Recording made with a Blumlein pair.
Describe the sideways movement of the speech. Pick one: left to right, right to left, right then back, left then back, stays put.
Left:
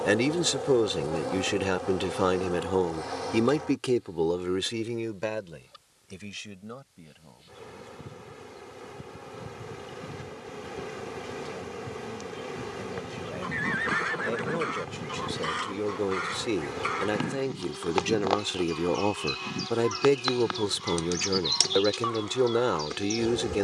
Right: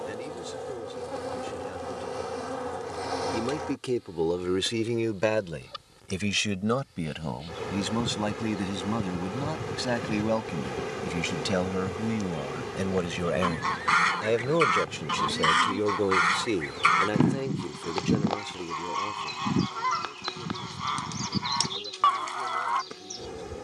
right then back.